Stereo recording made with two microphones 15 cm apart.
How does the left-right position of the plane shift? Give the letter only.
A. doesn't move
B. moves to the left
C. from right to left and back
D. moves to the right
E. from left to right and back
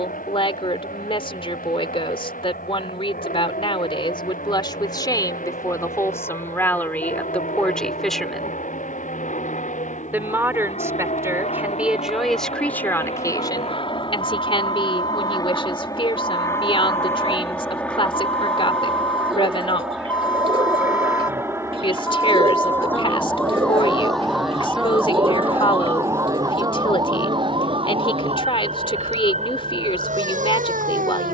D.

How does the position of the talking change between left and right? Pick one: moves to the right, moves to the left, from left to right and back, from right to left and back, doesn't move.
from left to right and back.